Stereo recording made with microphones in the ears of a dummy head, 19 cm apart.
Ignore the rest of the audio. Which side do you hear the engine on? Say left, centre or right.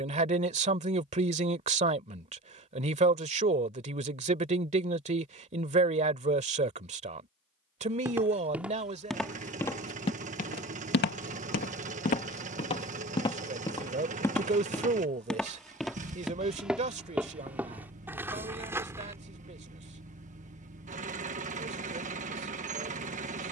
right.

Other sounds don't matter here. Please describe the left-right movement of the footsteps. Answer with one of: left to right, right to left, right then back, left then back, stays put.
left then back.